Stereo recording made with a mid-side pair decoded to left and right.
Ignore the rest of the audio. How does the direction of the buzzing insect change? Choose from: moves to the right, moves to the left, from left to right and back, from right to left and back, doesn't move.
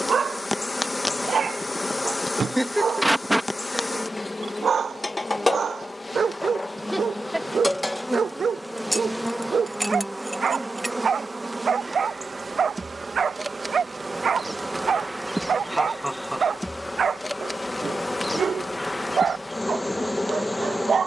from left to right and back.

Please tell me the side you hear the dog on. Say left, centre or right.
right.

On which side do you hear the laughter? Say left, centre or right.
centre.